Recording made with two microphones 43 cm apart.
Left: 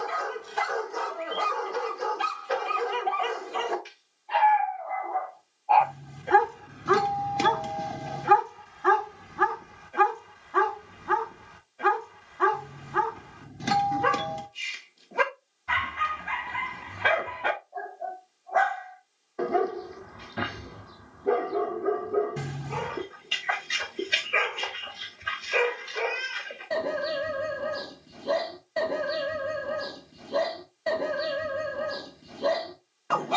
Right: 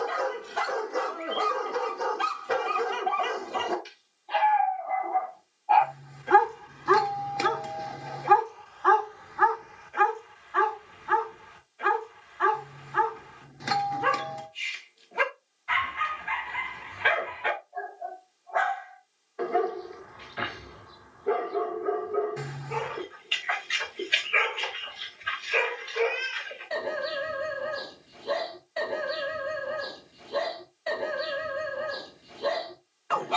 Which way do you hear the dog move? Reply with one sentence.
You can hear the dog move to the left.